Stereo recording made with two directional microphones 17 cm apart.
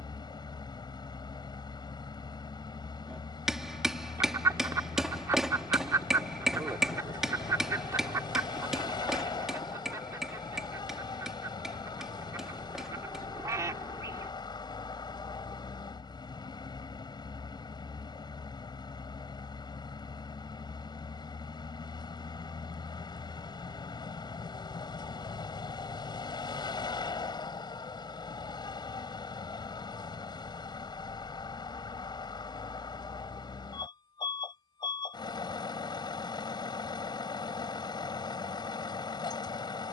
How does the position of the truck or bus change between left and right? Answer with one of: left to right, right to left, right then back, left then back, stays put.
stays put.